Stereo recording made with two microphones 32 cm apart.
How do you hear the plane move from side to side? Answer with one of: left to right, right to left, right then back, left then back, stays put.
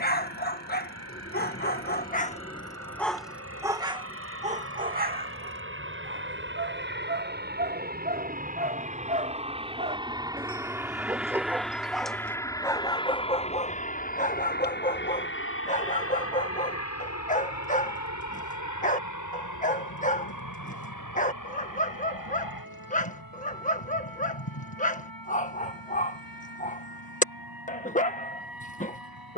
right to left.